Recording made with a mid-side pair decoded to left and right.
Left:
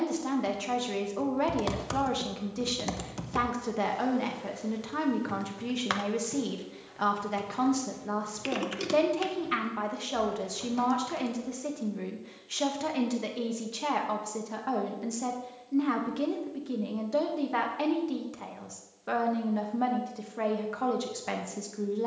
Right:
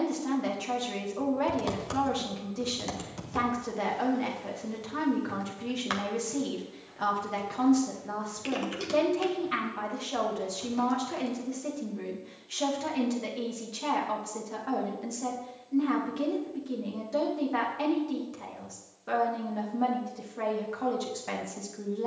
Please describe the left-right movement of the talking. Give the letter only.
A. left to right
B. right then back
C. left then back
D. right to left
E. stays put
E.